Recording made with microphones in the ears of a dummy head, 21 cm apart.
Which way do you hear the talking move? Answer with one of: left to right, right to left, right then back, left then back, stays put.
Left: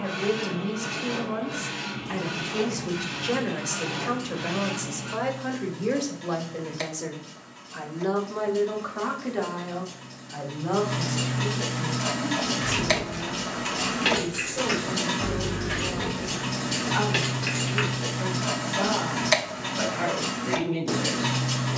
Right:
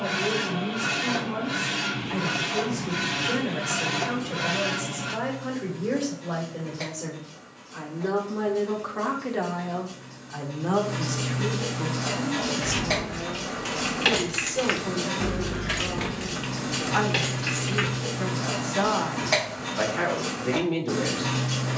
left to right.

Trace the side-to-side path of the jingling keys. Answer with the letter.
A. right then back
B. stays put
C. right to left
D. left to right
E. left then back
A.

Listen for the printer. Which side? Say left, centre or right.
right.